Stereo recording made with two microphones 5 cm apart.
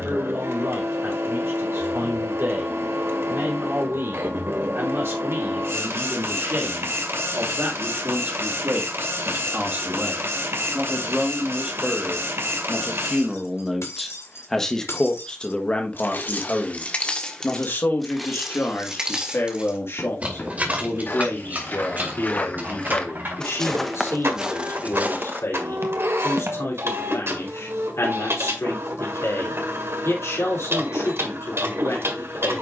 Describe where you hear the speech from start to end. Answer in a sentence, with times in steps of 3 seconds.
In this clip you hear the speech on the right from 0 s, in the centre from 12 s and on the left from 15 s.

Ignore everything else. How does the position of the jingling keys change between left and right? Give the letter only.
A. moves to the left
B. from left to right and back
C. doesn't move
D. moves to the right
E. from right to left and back
D.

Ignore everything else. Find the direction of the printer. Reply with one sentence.
You can hear the printer on the right.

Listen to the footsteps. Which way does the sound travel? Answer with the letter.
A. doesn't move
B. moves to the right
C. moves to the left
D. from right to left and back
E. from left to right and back
B.